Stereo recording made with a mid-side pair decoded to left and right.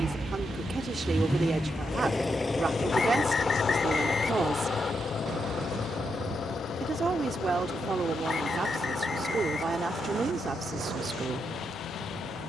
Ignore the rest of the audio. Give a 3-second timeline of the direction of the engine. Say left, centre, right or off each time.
centre, left, left, left.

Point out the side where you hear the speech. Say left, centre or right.
right.